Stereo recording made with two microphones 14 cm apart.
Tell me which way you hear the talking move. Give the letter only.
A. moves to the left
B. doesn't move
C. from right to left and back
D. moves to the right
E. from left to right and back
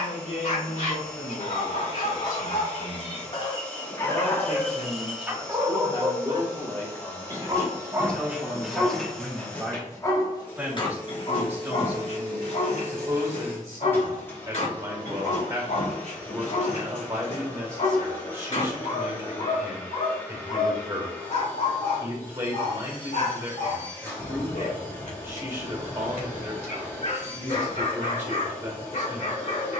D.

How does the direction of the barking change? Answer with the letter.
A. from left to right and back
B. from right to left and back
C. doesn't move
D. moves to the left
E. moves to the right
A.